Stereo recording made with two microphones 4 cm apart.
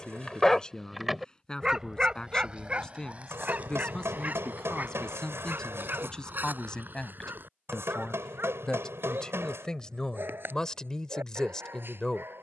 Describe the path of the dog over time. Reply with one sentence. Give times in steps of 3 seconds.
You can hear the dog in the centre from 0 s and on the right from 3 s.